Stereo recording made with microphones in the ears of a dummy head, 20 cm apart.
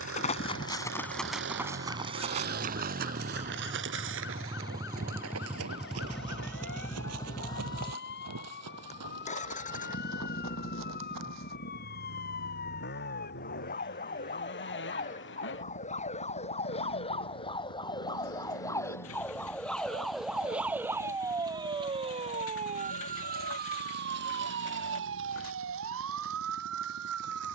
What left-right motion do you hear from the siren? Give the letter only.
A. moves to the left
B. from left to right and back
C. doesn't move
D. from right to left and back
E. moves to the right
E.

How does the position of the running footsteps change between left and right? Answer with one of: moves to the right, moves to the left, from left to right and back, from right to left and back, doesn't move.
moves to the right.